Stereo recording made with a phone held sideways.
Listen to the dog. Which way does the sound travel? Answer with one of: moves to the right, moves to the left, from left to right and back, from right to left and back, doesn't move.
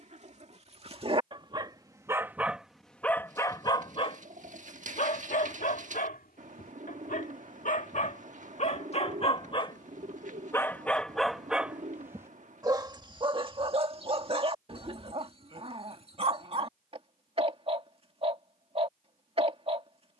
from right to left and back.